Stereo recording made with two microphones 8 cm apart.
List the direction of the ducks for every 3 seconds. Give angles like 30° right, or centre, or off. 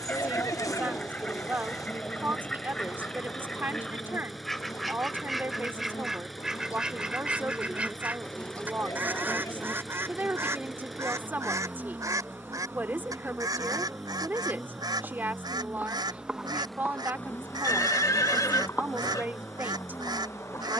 20° left, centre, 10° right, 30° right, 60° right, 70° right, 70° right.